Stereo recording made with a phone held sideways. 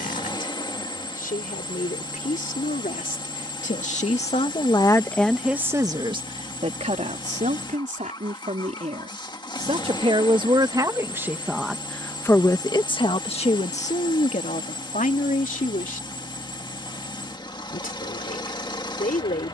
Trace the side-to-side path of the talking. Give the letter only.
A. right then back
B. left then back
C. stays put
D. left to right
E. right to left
A.